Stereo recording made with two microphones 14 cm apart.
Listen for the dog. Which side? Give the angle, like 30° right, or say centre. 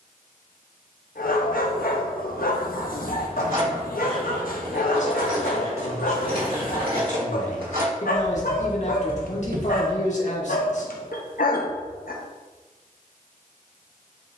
80° left.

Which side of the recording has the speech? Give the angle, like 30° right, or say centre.
50° left.